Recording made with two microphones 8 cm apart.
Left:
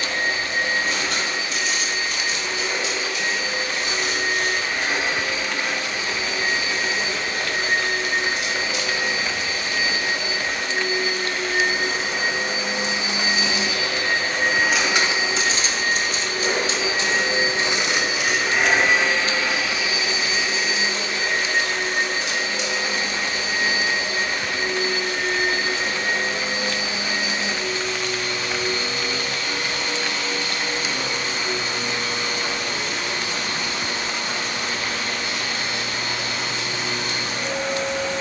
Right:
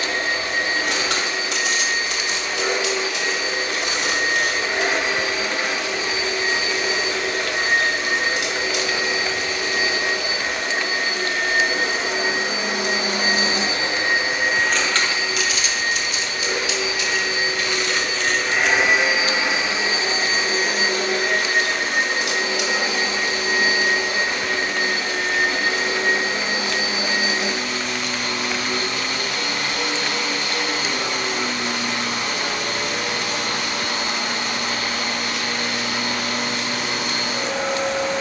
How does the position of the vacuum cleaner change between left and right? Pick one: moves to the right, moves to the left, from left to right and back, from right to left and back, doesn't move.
from right to left and back.